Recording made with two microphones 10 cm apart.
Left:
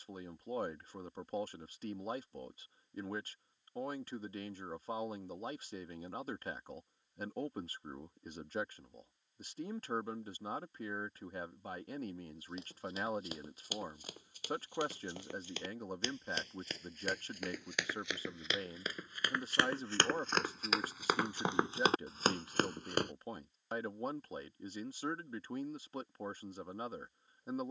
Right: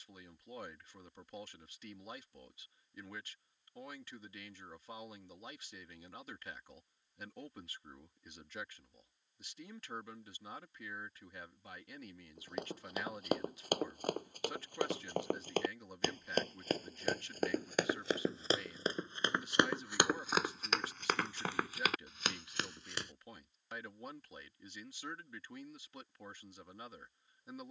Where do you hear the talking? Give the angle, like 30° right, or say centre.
40° left.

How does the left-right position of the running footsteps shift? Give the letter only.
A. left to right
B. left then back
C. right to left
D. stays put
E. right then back
C.